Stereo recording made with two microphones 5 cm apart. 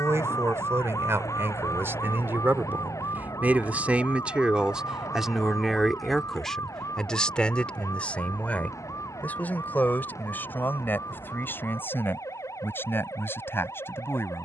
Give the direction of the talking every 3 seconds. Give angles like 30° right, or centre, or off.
60° right, 20° right, 20° left, 40° left, 50° left.